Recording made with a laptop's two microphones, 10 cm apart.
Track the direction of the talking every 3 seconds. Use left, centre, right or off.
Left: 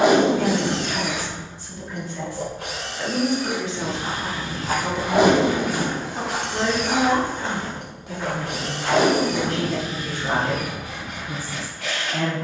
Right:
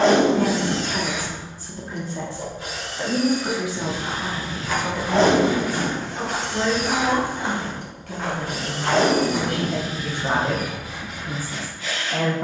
right, centre, left, right.